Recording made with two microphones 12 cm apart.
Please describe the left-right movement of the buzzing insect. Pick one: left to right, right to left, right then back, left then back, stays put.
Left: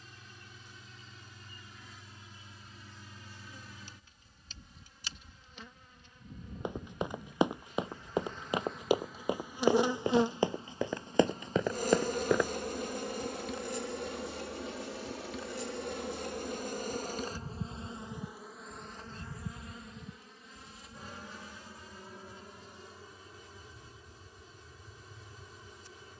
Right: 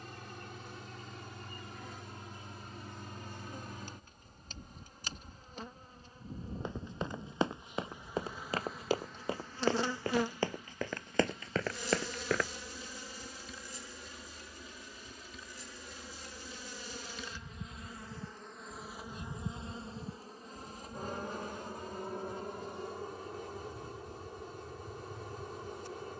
left then back.